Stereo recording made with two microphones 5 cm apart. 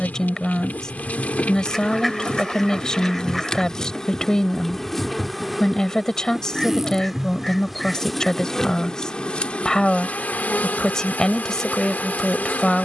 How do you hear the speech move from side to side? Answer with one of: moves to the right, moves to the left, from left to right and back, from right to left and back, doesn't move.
doesn't move.